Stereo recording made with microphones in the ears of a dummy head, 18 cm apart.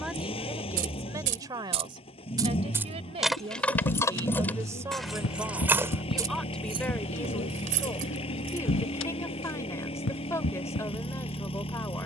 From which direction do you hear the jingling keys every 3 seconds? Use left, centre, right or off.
right, centre, right, off.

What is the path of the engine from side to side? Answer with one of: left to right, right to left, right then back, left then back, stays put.
stays put.